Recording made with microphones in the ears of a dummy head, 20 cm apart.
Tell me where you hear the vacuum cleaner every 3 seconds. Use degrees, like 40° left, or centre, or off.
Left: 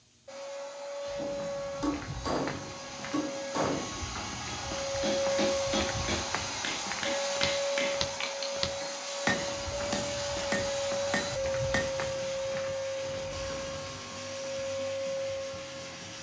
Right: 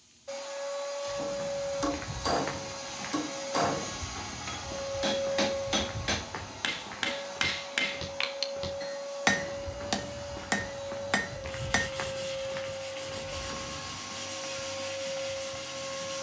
30° right, 10° left, 60° left, 60° left, centre, 30° right.